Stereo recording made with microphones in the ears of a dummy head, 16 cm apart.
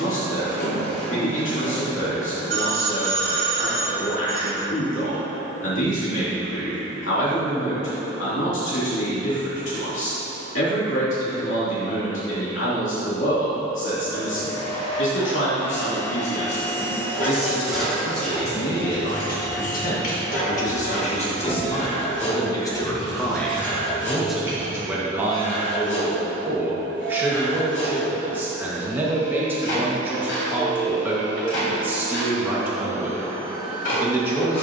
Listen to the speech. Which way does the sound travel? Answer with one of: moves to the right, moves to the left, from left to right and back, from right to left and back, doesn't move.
moves to the right.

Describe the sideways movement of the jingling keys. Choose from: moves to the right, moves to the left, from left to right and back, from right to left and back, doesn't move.
from right to left and back.